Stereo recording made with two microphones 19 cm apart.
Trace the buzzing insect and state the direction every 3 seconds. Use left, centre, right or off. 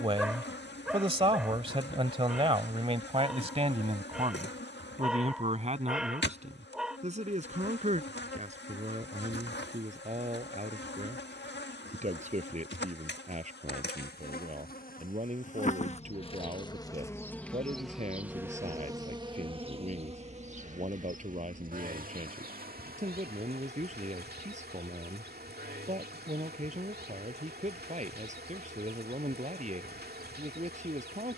left, left, left, left, left, left, right, right, right, right, right.